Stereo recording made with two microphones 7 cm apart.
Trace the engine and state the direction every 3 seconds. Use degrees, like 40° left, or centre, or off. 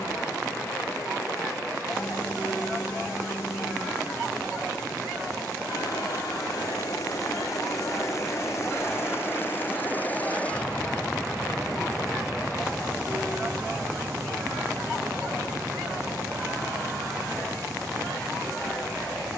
70° left, 60° left, 50° left, 20° left, 20° right, 40° right, 50° right.